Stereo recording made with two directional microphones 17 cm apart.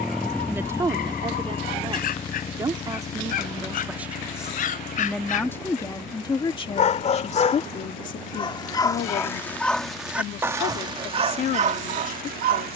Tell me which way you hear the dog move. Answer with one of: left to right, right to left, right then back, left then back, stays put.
left to right.